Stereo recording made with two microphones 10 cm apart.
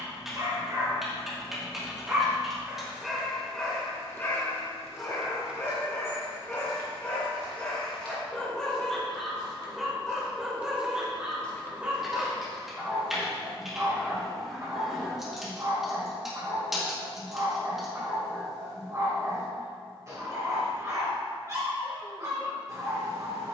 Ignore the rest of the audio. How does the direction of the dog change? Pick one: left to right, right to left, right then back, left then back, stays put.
left then back.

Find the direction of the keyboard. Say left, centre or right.
centre.